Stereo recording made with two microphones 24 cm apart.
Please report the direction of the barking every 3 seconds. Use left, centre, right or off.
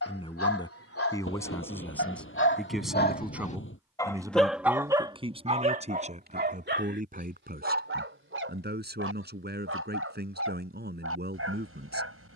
left, centre, right, right.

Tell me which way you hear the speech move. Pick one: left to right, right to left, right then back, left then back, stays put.
left to right.